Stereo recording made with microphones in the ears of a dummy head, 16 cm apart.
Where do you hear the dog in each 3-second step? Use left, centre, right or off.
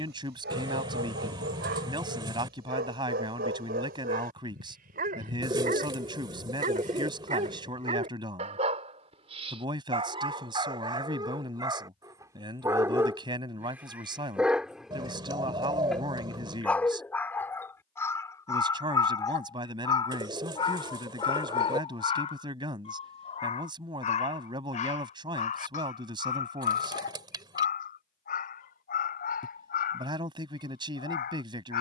right, right, right, right, centre, centre, left, left, left, left, left.